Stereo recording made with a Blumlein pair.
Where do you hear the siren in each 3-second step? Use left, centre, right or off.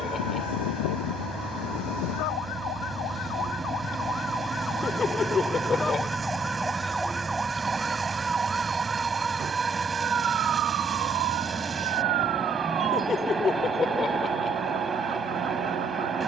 left, left, centre, right, right, right.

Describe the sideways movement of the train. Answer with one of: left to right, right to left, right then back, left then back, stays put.
stays put.